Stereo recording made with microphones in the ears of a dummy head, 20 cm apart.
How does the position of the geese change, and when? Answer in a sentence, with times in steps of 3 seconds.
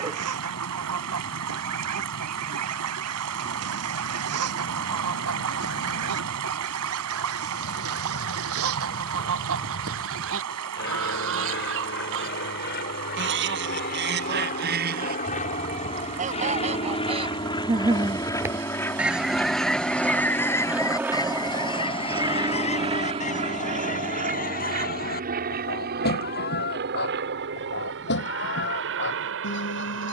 You can hear the geese on the right from 0 s, in the centre from 18 s and on the left from 21 s.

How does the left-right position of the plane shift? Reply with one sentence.
You can hear the plane go from the left side to the right.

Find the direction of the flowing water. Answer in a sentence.
In this clip you hear the flowing water on the right.